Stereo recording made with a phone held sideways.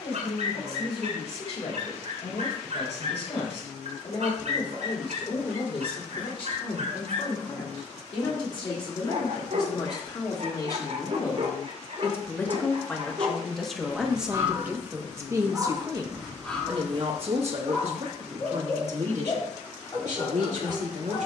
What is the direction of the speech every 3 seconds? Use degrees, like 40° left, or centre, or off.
50° left, 50° left, 40° left, 30° left, centre, 40° right, 70° right.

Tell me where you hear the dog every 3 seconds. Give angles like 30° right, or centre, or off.
80° right, 80° right, 80° right, 70° right, 30° right, 10° left, 30° left.